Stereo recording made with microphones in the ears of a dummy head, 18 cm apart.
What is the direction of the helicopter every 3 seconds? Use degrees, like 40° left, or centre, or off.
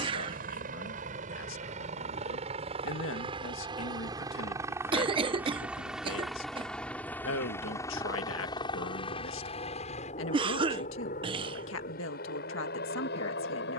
40° right, 20° right, 10° left, 40° left, 50° left.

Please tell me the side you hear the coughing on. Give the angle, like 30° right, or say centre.
30° right.